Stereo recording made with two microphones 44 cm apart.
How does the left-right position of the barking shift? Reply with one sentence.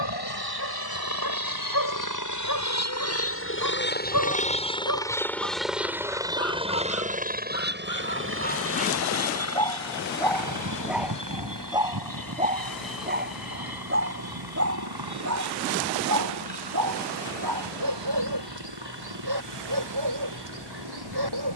In this clip you hear the barking move to the right.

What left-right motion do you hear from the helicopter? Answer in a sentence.
In this clip you hear the helicopter go from the left side to the right.